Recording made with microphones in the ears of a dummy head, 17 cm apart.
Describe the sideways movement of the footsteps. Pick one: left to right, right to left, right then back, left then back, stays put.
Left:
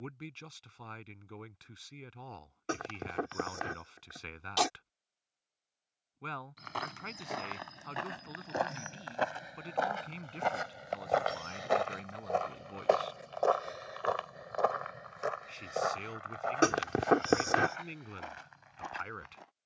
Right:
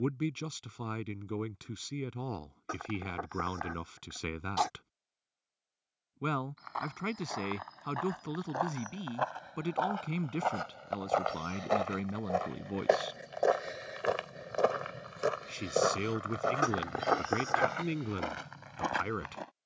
left to right.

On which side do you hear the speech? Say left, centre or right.
right.